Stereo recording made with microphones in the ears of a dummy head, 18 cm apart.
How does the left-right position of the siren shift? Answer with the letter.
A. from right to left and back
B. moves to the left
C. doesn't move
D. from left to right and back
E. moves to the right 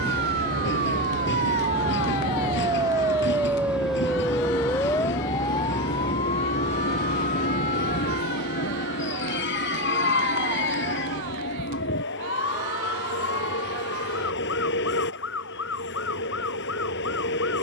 B.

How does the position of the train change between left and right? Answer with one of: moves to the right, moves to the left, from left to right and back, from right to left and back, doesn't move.
doesn't move.